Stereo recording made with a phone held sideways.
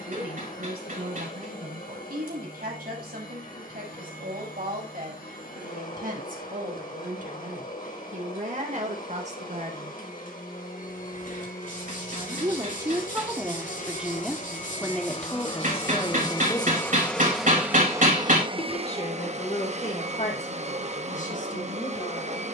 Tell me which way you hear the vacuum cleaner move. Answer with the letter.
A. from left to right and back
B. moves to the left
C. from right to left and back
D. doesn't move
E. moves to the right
E.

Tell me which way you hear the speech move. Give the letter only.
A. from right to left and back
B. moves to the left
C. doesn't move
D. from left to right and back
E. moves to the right
B.